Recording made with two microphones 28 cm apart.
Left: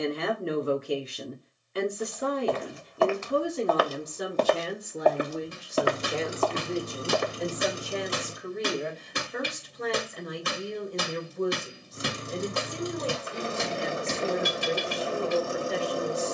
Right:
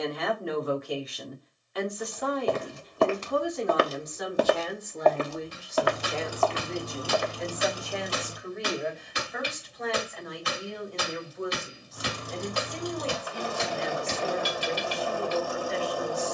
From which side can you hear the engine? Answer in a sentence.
You can hear the engine on the left.